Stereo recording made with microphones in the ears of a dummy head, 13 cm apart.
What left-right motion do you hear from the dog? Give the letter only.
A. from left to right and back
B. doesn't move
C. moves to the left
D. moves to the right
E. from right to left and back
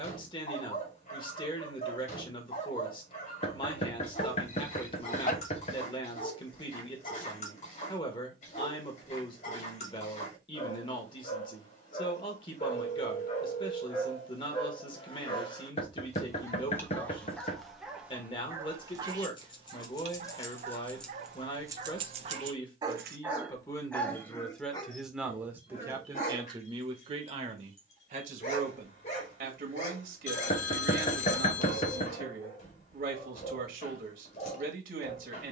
A.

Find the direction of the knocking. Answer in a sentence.
You can hear the knocking on the left.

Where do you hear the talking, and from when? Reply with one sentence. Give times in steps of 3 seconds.
You can hear the talking on the left from 0 s, in the centre from 24 s and on the right from 27 s.